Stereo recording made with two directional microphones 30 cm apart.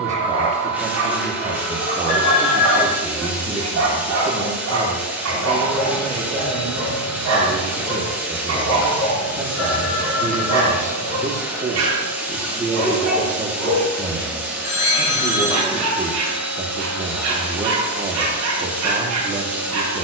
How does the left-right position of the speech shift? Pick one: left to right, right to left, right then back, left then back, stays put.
stays put.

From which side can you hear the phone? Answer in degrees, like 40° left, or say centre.
60° left.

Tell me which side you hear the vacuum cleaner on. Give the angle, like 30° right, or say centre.
10° right.